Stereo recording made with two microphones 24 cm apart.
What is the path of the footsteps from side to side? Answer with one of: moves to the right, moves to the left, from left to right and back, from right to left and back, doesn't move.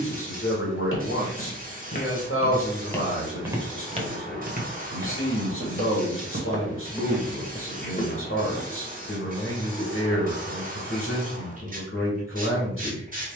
from left to right and back.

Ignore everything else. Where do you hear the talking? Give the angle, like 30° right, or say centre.
60° left.